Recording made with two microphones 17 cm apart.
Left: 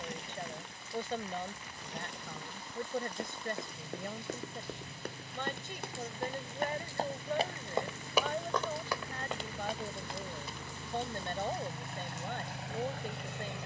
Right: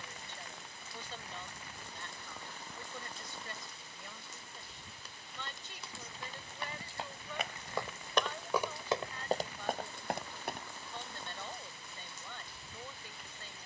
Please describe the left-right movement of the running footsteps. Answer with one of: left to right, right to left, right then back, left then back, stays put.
left to right.